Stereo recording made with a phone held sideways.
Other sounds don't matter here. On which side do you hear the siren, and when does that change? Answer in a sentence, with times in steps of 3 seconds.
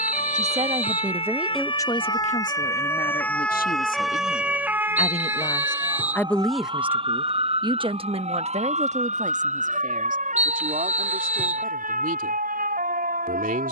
You can hear the siren on the left from 0 s, in the centre from 3 s and on the right from 6 s.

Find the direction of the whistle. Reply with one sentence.
In this clip you hear the whistle in the centre.